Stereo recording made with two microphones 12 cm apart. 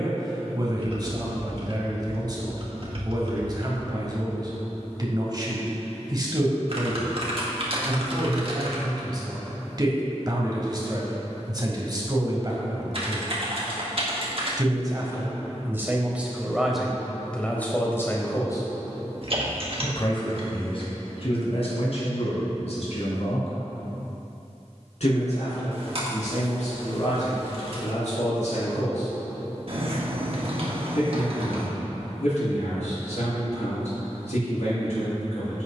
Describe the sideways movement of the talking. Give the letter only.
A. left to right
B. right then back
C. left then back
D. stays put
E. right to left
E.